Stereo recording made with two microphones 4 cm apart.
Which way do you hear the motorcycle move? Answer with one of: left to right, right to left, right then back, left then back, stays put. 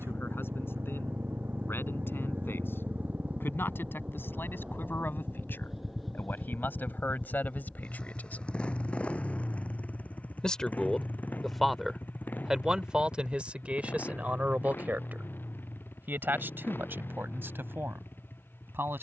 right to left.